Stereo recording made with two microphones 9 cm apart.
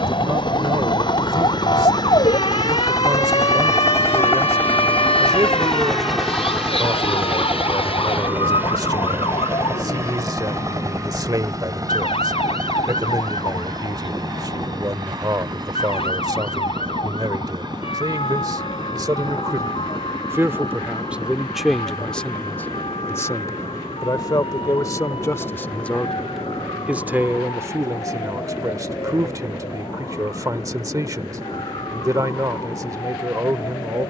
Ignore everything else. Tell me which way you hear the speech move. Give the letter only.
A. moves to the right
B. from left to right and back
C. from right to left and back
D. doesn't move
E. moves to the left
C.